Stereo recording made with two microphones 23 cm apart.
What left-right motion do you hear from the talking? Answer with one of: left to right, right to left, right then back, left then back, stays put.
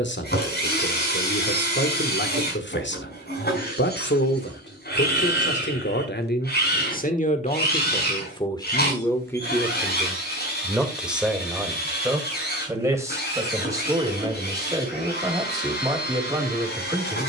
left to right.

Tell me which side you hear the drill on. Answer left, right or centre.
left.